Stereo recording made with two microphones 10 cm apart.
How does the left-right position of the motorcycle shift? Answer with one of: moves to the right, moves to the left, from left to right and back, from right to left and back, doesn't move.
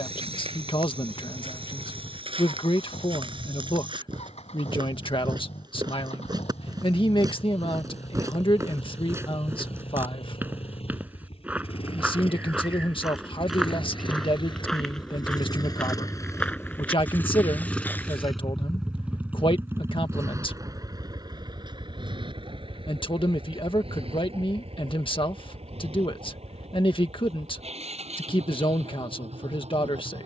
moves to the right.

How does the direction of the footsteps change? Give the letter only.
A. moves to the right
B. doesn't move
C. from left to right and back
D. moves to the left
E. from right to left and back
D.